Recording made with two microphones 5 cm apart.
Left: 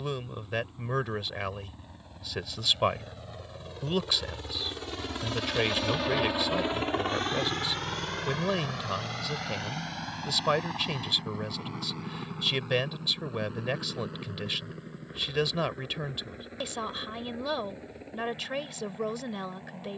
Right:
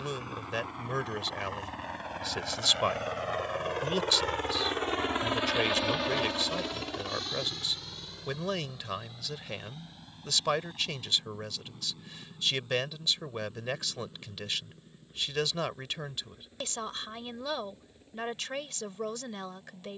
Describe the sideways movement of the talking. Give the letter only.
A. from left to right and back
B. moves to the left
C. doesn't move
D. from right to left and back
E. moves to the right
C.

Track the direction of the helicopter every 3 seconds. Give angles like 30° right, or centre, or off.
70° right, 40° right, 40° left, 70° left, 80° left, 80° left, 80° left.